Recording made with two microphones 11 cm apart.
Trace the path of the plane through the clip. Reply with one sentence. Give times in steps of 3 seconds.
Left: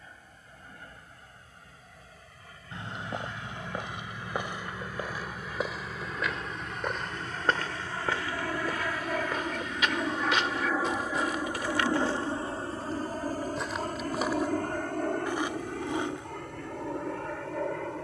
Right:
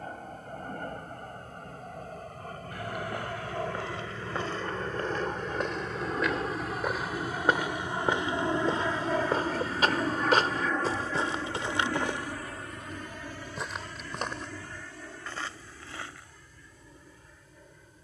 In this clip you hear the plane on the right from 0 s, in the centre from 9 s and on the left from 12 s.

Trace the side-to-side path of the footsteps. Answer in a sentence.
You can hear the footsteps go right and come back.